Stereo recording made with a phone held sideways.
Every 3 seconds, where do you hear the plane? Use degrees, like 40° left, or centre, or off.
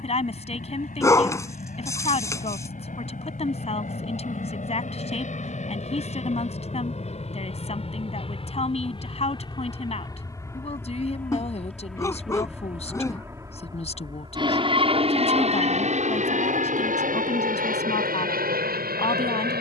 60° left, 60° left, 40° left, 20° left, 20° right, 50° right, 60° right.